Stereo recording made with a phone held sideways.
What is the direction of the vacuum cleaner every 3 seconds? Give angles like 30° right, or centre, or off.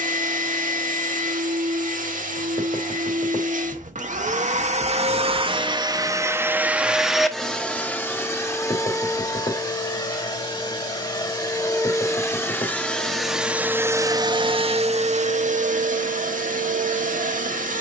80° right, 60° right, centre, 30° left, 10° right, 70° right.